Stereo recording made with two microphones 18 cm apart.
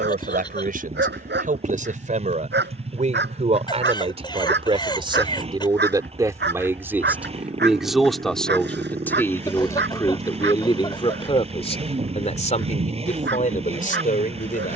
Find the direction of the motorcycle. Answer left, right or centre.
right.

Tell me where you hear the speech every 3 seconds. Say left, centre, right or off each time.
right, right, centre, left, left.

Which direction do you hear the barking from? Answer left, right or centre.
right.